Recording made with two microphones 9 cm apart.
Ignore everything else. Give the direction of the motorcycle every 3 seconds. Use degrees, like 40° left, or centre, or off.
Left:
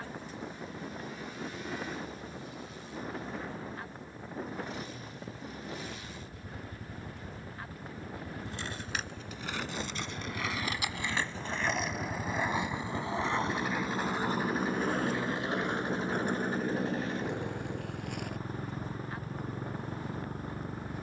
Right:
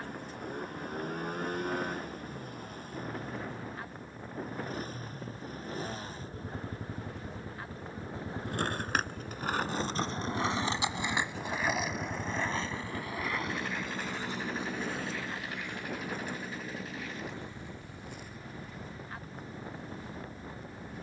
50° right, 50° right, 30° right, 10° right, 10° left, 30° left, 50° left.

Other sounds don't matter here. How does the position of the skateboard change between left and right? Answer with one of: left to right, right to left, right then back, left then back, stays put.
right to left.